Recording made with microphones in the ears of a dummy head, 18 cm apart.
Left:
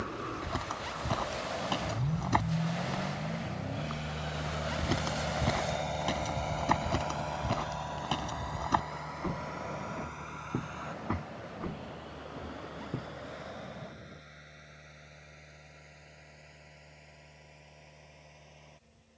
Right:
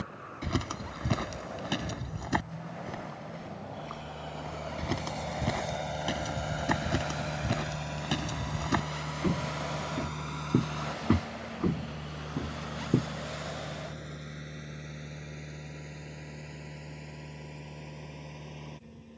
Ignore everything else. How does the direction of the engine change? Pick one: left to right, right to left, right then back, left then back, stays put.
left to right.